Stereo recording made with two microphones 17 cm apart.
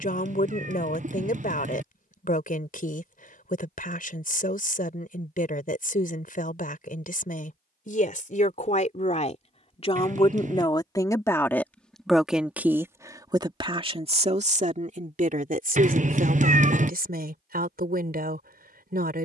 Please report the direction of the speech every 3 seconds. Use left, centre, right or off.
left, left, left, left, right, right, right.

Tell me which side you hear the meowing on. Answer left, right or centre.
right.